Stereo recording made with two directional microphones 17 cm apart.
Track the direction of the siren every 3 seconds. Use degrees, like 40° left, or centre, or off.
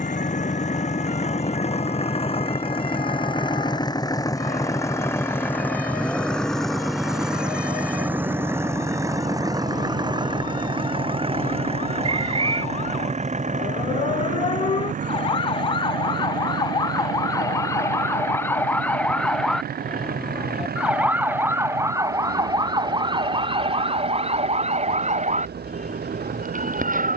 60° left, 60° left, 60° left, 50° left, 40° left, 30° left, 10° left, 20° right, 40° right.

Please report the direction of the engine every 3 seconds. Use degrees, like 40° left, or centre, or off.
40° left, 20° left, centre, 30° right, 40° right, 50° right, 60° right, 60° right, 70° right.